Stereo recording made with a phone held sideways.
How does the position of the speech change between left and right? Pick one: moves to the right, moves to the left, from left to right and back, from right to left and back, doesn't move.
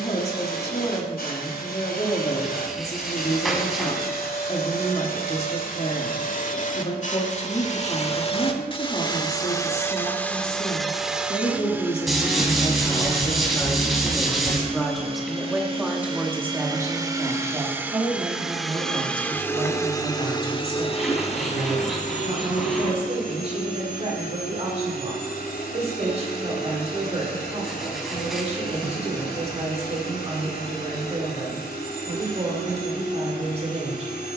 moves to the right.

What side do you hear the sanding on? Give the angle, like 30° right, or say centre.
centre.